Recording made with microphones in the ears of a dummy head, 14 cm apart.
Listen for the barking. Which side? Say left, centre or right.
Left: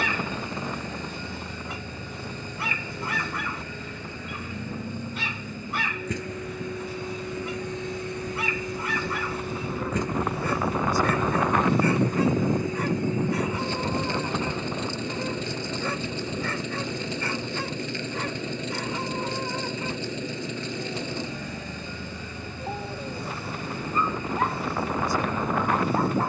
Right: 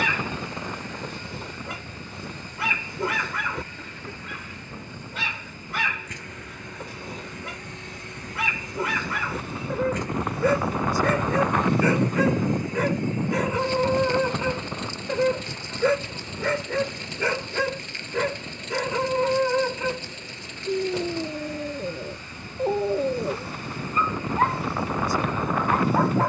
right.